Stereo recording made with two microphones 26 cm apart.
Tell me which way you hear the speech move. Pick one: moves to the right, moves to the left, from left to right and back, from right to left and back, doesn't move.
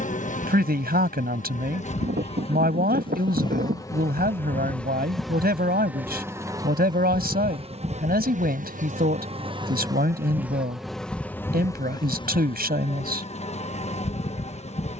doesn't move.